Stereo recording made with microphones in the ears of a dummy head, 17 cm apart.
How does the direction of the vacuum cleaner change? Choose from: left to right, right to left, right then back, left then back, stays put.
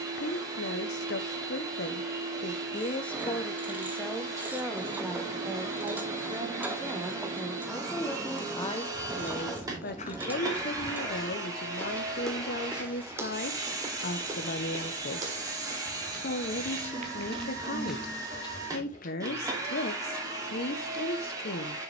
stays put.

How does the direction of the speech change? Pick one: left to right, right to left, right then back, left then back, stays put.
right then back.